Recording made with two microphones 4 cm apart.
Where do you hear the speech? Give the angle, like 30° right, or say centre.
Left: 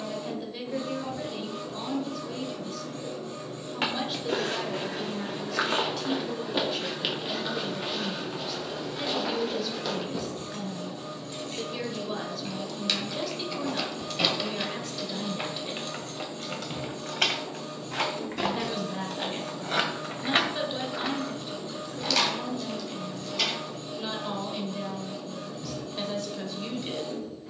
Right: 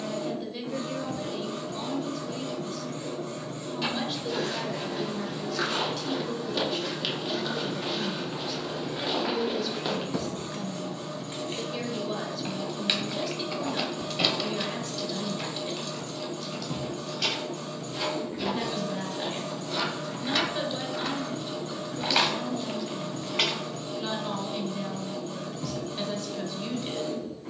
centre.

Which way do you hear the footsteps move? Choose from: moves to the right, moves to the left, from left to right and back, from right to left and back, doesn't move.
moves to the right.